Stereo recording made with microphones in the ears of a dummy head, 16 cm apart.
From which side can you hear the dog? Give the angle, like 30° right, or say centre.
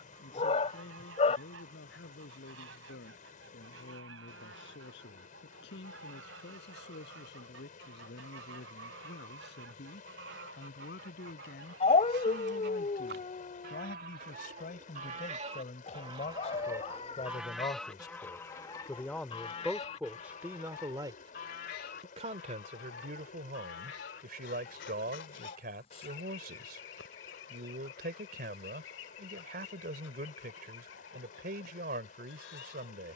30° left.